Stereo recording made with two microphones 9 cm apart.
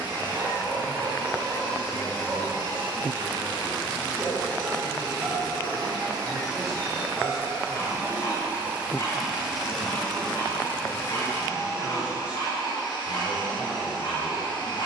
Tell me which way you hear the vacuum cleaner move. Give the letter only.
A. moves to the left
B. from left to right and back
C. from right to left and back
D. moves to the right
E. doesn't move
A.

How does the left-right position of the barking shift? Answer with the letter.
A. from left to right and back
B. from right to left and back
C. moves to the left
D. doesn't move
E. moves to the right
C.